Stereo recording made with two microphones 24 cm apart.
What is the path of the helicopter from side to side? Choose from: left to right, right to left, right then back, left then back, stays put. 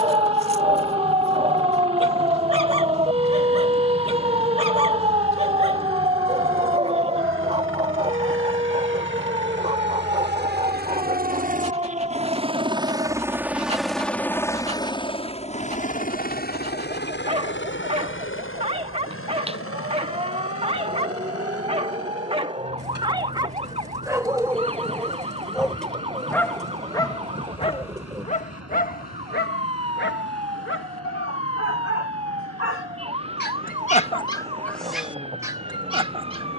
right to left.